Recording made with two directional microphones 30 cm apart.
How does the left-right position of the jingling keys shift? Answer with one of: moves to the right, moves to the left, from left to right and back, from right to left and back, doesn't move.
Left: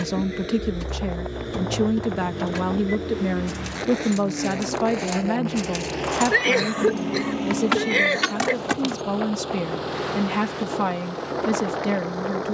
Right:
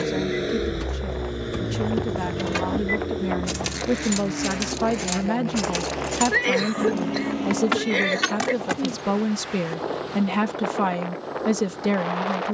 from left to right and back.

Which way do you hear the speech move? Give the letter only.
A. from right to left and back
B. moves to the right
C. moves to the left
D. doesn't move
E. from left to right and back
B.